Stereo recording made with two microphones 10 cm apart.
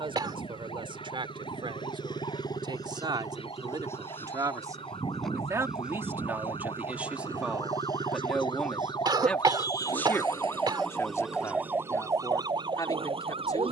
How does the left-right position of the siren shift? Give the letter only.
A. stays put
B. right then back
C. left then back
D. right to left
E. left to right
E.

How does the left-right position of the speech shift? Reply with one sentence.
In this clip you hear the speech move to the left.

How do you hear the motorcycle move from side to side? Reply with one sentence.
In this clip you hear the motorcycle move from left to right.